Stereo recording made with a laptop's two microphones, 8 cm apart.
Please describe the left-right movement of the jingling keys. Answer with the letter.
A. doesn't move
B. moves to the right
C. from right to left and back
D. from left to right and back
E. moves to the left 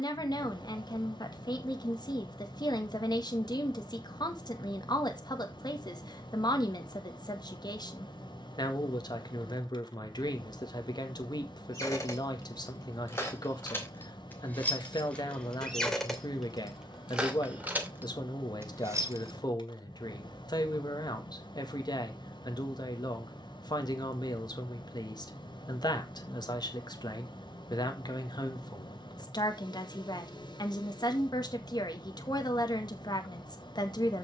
B.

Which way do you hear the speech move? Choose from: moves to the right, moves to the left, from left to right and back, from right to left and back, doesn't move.
doesn't move.